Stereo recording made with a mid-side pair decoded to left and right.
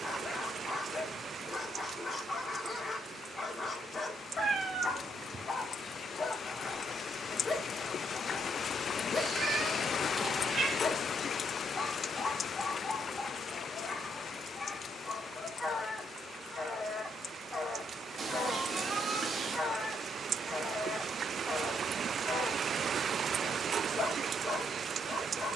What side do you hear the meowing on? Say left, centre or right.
right.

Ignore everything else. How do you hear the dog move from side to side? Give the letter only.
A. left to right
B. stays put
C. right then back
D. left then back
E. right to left
B.